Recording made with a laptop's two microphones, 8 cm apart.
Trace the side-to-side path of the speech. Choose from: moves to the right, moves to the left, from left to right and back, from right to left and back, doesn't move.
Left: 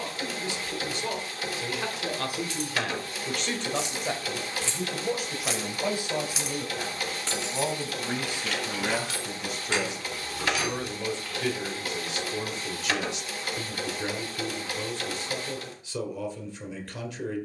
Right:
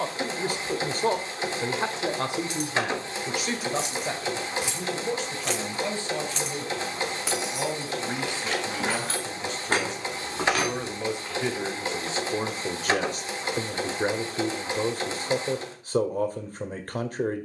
from right to left and back.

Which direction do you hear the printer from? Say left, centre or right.
right.